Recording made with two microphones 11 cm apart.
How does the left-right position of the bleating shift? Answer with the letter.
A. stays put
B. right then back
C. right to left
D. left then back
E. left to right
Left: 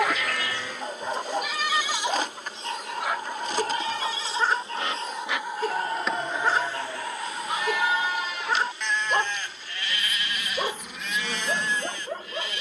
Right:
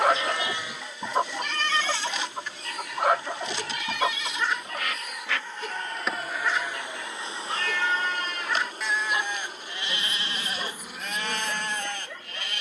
D.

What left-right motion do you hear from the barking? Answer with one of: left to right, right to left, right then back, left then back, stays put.
stays put.